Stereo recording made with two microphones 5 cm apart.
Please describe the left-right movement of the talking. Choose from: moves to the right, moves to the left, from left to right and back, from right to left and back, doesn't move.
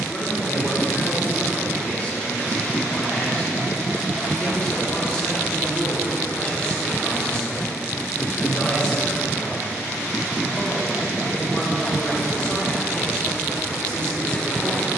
doesn't move.